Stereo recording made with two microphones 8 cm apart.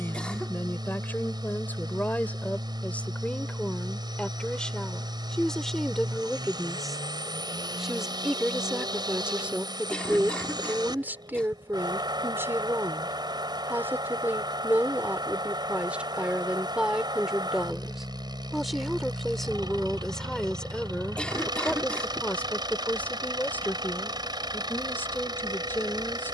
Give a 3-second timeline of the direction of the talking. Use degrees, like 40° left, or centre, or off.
20° left, 10° left, centre, 20° right, 20° right, 10° right, centre, 20° left, 20° left.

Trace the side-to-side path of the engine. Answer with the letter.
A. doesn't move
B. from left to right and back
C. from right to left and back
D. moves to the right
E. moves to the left
A.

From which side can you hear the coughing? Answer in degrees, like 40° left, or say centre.
10° left.